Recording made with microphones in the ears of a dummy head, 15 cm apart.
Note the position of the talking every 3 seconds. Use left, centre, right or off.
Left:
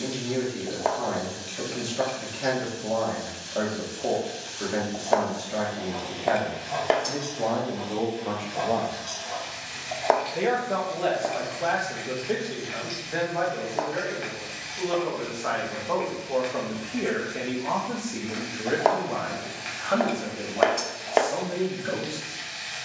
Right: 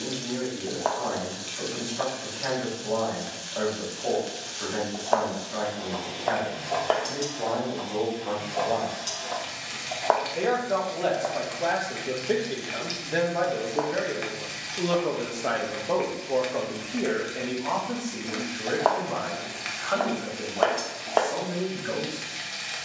left, left, left, centre, right, centre, left, left.